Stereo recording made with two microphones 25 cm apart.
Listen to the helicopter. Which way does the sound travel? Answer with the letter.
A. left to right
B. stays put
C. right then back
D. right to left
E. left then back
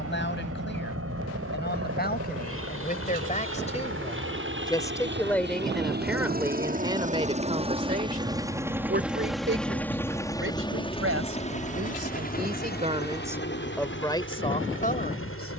D.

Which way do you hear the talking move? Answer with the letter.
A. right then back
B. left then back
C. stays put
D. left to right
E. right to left
A.